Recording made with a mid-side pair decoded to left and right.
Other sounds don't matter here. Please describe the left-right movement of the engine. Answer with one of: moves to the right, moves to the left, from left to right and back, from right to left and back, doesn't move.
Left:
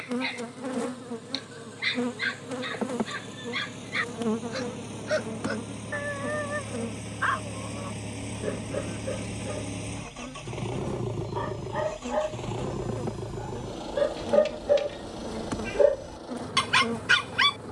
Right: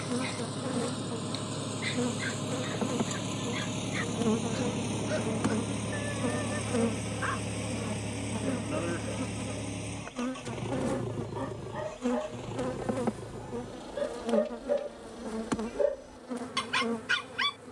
moves to the left.